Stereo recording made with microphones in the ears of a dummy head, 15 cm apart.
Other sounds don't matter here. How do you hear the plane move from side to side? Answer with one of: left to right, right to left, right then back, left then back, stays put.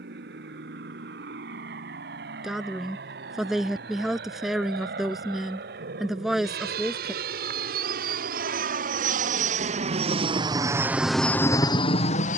right to left.